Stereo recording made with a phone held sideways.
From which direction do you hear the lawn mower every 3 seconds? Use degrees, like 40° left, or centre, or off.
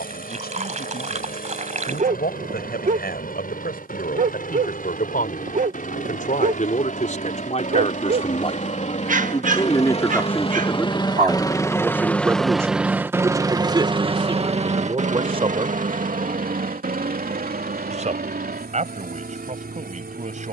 70° left, 70° left, 60° left, 40° left, 20° right, 60° right, 80° right.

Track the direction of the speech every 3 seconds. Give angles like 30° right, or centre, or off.
80° left, 70° left, 50° left, 10° left, 20° right, 40° right, 50° right.